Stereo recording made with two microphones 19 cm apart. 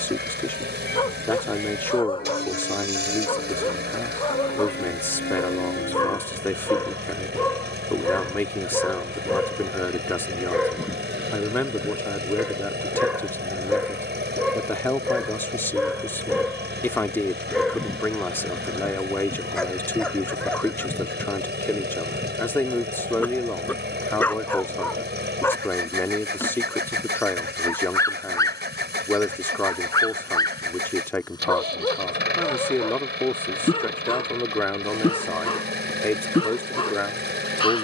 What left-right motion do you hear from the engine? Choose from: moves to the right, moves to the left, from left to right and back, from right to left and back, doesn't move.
doesn't move.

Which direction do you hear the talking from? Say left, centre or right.
centre.